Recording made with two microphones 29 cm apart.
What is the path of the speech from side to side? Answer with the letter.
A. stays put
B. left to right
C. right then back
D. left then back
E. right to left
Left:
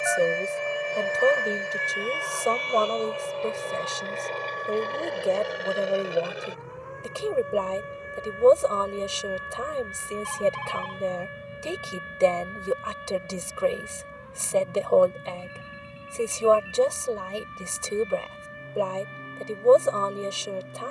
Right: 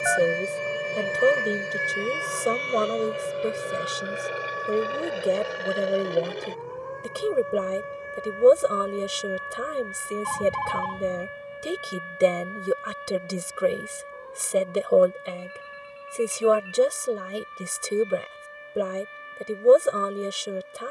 A.